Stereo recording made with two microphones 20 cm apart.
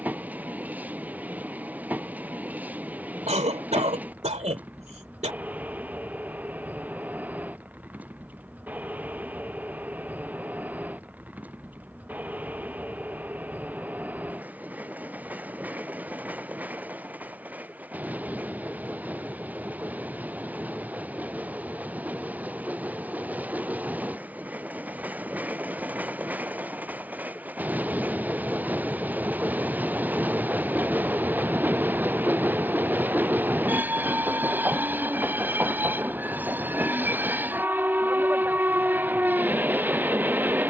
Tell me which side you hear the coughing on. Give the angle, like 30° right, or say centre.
30° right.